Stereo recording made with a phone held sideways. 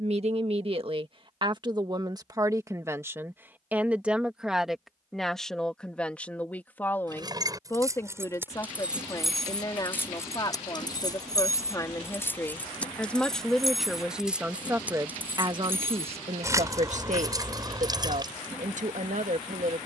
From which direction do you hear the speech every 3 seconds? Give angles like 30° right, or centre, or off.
30° right, centre, 20° left, 30° left, centre, 50° right, 60° right.